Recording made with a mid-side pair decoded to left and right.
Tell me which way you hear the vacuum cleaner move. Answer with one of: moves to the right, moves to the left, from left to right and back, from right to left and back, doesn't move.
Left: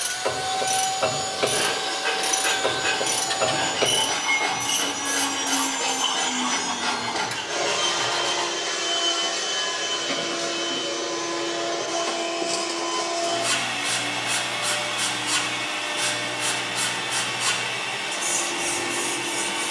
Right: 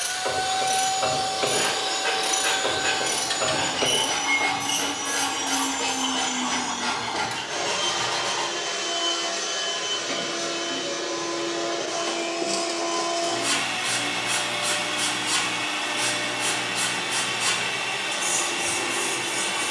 from right to left and back.